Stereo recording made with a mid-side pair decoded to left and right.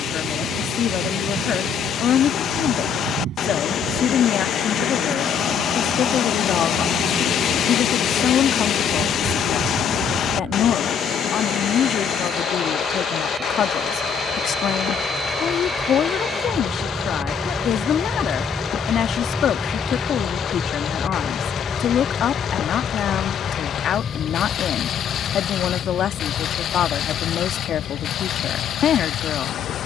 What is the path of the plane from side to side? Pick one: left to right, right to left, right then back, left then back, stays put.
right to left.